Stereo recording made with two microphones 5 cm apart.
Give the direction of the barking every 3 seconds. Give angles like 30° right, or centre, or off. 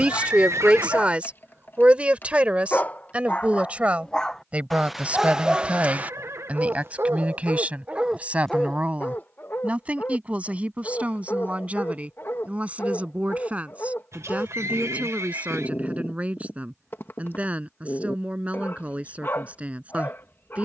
40° left, centre, 30° right, 40° left, 40° left, 40° left, 40° left.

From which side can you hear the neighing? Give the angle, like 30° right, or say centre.
60° right.